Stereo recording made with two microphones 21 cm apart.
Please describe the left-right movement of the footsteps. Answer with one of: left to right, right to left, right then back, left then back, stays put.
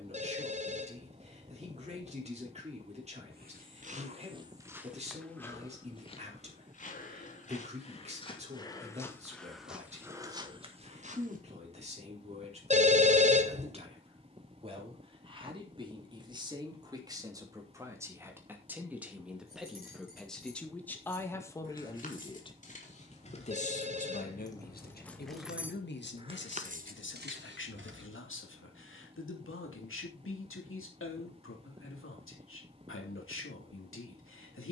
left then back.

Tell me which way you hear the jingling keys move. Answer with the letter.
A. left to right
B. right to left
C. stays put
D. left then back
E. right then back
A.